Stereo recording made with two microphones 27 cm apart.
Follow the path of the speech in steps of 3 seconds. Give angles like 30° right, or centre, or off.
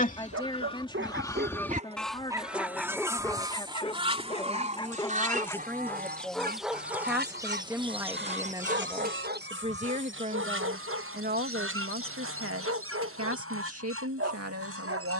20° left, 10° left, 10° right, 30° right, 60° right.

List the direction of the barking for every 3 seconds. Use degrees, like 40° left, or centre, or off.
30° right, 20° left, 10° right, 50° right, 50° right.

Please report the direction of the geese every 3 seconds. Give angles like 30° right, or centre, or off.
10° left, 20° right, 40° right, 50° right, 60° right.